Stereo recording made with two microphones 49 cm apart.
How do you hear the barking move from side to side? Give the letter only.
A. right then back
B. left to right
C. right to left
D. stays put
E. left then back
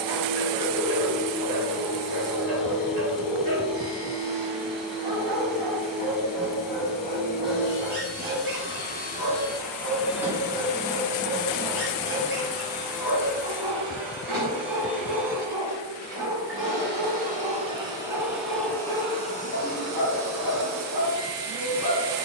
D.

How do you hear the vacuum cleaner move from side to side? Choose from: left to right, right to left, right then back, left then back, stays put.
right then back.